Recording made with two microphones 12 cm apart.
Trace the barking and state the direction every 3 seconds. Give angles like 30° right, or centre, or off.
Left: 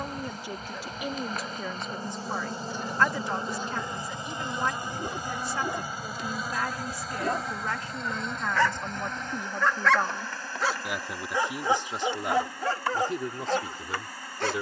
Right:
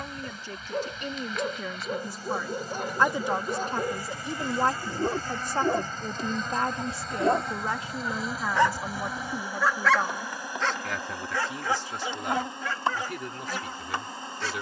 50° right, 40° right, 20° right, 10° left, 40° left.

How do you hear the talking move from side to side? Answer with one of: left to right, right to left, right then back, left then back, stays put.
right then back.